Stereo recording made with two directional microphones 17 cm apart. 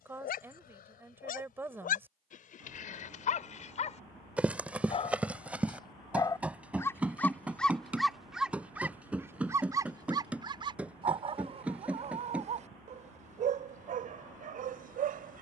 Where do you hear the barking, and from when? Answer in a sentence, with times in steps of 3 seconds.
You can hear the barking on the left from 0 s, in the centre from 6 s and on the right from 9 s.